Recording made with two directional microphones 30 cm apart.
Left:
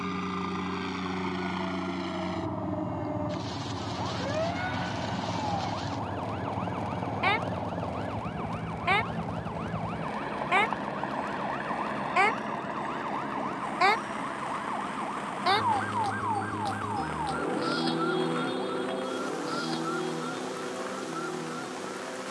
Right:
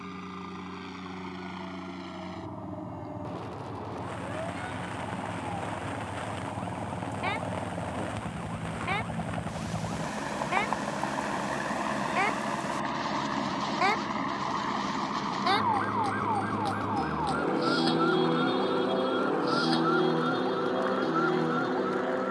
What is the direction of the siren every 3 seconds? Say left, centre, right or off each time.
left, left, left, left, left, centre, right, right.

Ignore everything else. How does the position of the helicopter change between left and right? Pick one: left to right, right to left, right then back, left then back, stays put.
left to right.